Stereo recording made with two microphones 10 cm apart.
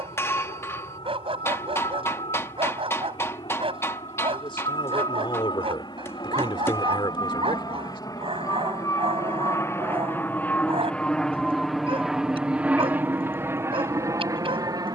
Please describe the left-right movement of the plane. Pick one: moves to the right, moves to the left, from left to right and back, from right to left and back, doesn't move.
moves to the right.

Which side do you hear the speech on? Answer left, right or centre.
left.